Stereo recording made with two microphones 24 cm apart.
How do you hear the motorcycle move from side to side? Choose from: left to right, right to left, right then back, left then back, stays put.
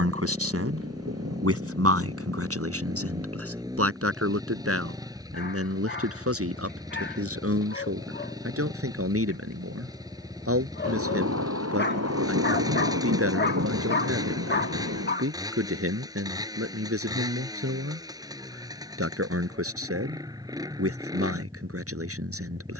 stays put.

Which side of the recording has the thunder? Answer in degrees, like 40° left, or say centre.
80° right.